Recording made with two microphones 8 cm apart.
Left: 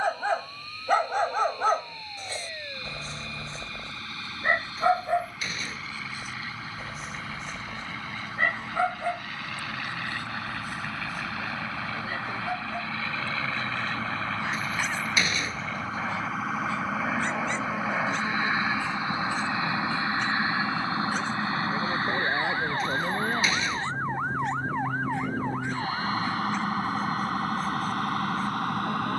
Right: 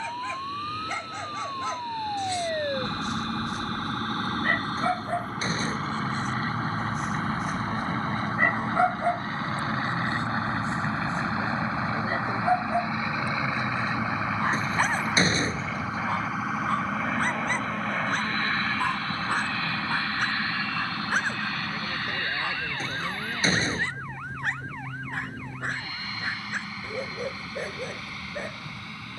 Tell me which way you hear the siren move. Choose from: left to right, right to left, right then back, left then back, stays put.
right to left.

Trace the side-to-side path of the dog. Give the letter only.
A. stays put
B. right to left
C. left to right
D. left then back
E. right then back
C.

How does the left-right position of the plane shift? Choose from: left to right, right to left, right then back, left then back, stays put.
right to left.